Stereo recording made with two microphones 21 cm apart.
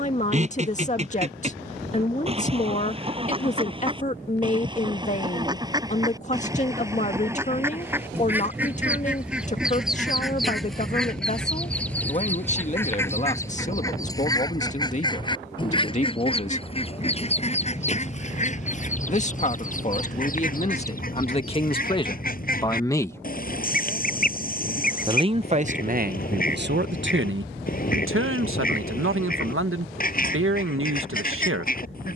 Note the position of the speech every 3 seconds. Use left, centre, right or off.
left, left, left, left, left, left, left, left, right, right, right.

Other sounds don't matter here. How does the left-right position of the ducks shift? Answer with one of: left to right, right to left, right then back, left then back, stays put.
right to left.